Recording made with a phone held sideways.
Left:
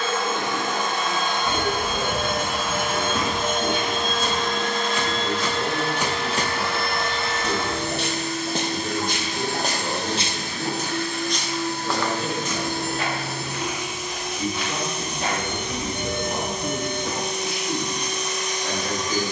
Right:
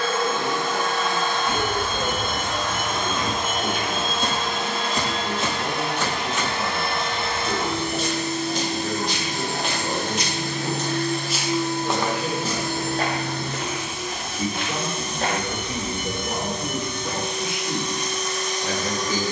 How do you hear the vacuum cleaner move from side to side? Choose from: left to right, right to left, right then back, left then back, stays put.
right then back.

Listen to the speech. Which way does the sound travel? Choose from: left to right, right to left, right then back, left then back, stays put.
left then back.